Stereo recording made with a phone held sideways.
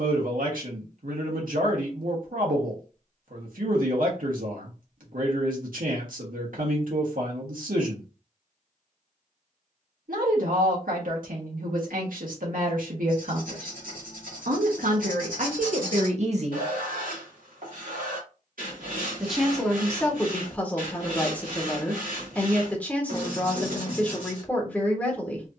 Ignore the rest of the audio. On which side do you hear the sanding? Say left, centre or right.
right.